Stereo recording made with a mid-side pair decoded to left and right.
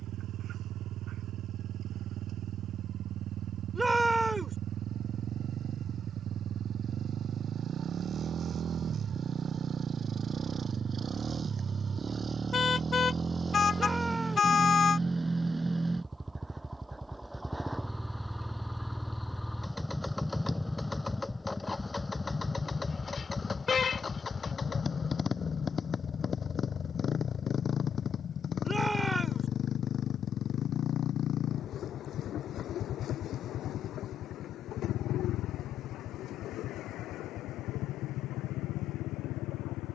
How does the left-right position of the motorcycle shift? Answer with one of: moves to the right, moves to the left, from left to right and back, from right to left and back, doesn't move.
moves to the left.